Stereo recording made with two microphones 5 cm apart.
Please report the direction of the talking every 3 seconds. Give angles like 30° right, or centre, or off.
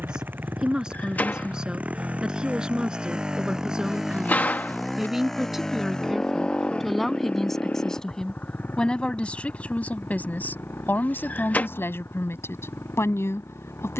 20° right, 10° right, 10° left, 40° left, 60° left.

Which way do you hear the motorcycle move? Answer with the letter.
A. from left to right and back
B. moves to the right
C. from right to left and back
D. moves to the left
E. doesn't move
D.